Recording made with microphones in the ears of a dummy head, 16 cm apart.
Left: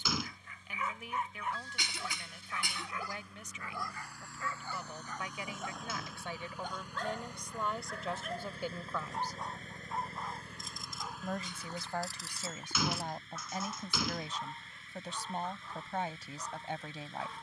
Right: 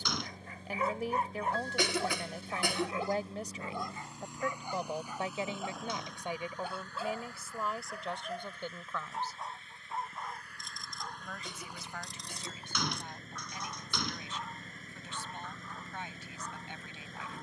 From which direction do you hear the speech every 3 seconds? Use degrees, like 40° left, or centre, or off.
30° right, 30° right, centre, 20° left, 30° left, 30° left.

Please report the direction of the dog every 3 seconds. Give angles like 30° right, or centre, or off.
30° right, 20° right, 10° right, centre, 10° left, 10° left.